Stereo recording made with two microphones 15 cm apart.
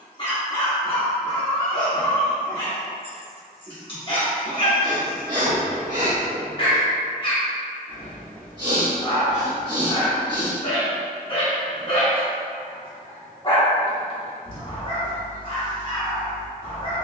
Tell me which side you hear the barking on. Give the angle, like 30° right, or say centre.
30° left.